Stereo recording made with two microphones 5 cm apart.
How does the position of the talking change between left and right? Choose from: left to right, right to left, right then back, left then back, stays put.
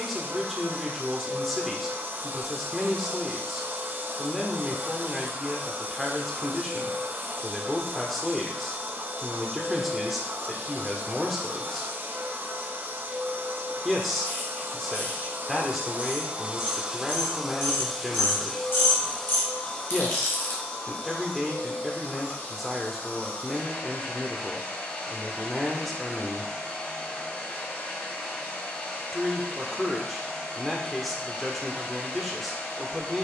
stays put.